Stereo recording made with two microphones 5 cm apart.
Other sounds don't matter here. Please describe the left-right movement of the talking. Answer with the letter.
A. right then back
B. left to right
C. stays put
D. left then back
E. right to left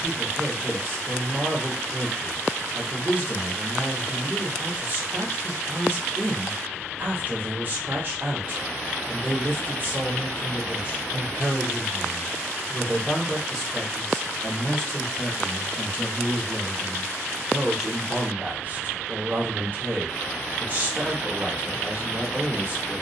D.